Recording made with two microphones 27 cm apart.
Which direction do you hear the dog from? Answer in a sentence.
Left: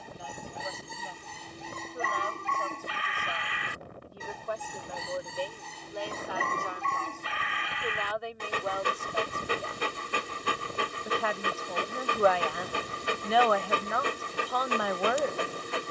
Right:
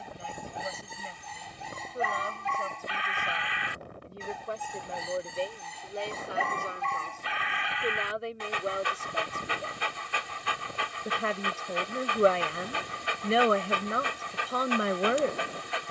You can hear the dog on the left.